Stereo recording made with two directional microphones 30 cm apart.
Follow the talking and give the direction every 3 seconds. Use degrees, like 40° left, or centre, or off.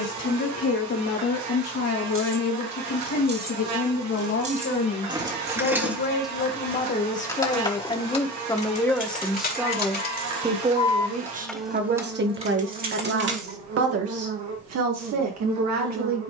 60° left, 50° left, 20° left, 10° right, 50° right, 60° right.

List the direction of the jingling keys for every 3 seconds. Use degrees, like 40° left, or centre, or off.
40° right, 20° right, 10° left, 20° left, 30° right, off.